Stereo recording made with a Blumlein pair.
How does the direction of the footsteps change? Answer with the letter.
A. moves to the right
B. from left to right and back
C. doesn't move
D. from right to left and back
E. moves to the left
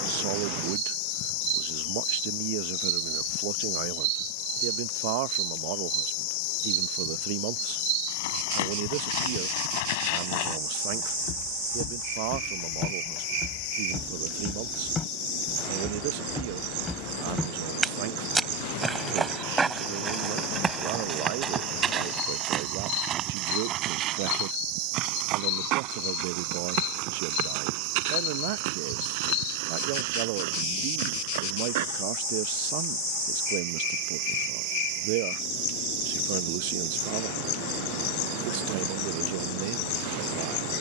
A.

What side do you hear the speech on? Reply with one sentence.
In this clip you hear the speech on the right.